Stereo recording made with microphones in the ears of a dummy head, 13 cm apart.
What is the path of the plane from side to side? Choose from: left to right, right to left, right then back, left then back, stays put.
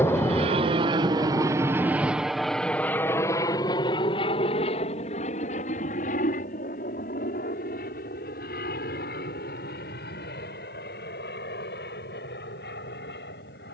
right to left.